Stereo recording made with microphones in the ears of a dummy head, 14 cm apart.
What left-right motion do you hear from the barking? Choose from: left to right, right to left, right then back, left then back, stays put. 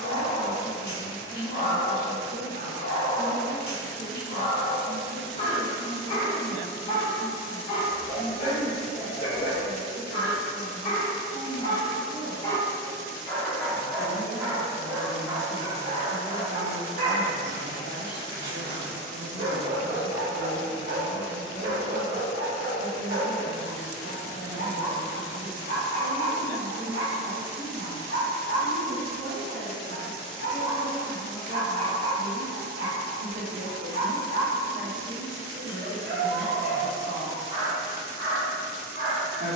left to right.